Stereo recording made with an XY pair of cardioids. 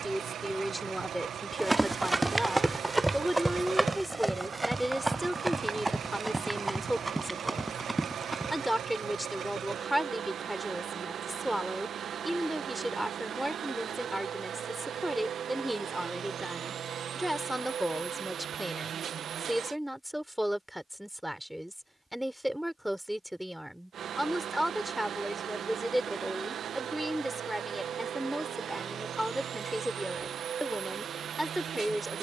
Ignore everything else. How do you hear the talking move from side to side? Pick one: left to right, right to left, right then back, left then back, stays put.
stays put.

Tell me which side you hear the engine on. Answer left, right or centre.
right.